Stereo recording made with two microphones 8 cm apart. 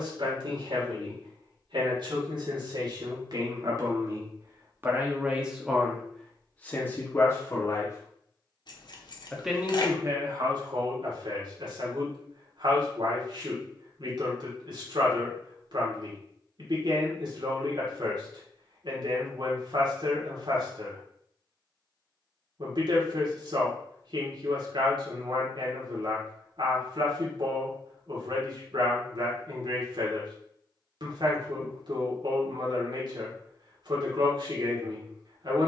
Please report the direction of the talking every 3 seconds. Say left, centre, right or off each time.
right, right, left, right, right, right, right, right, right, right, right, right.